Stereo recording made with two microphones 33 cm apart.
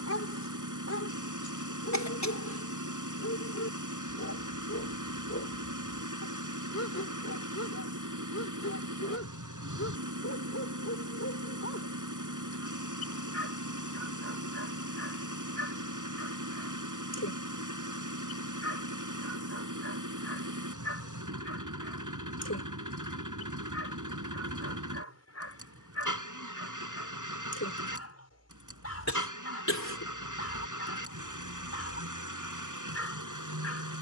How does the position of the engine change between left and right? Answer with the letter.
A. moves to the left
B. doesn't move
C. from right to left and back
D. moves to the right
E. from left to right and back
B.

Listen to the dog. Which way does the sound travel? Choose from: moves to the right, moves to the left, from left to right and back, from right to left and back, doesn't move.
doesn't move.